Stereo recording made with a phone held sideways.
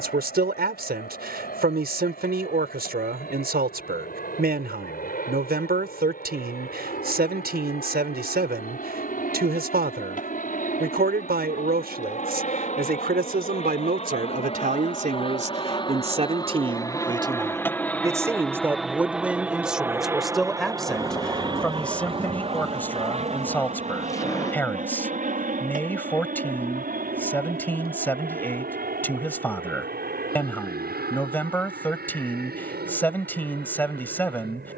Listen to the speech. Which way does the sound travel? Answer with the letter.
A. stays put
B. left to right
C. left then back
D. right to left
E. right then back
D.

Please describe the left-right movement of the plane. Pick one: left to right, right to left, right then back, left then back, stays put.
left to right.